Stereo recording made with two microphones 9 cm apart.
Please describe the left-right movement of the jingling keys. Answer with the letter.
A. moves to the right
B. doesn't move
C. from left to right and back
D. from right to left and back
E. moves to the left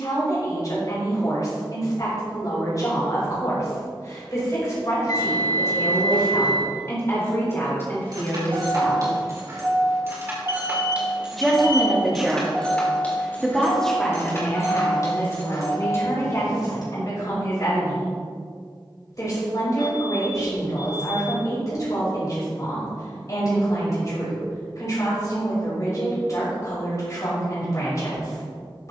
E.